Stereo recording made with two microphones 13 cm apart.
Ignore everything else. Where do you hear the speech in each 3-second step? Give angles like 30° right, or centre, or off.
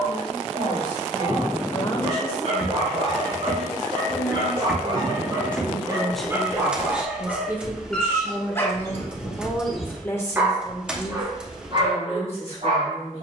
50° left, 20° left, 10° right, 30° left, 50° left.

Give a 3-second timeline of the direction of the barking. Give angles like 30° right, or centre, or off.
60° right, 40° right, centre, 10° right, 50° right.